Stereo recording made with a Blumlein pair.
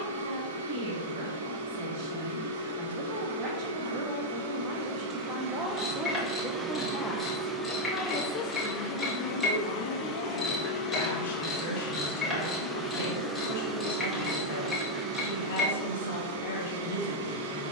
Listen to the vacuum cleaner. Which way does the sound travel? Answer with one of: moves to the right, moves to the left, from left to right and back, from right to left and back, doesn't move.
from right to left and back.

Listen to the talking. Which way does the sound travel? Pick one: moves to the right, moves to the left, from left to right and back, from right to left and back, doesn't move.
moves to the left.